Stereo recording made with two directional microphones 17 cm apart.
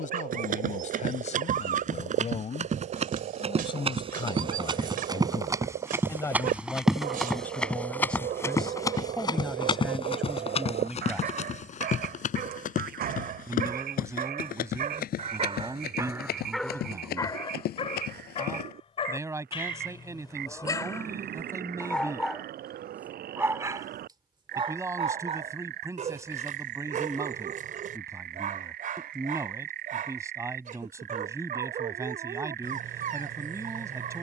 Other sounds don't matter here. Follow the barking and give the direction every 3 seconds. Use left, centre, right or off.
right, right, right, right, right, centre, left, centre, right, right, right, right.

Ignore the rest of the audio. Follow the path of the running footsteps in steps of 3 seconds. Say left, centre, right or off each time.
right, right, centre, left, left, left, left, off, off, off, off, off.